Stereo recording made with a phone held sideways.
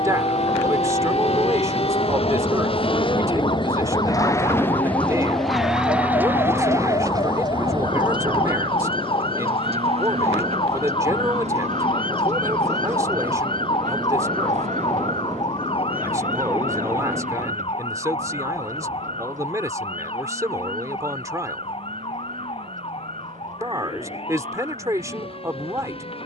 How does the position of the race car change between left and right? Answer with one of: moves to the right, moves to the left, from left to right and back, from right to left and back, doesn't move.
moves to the right.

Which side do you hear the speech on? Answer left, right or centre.
right.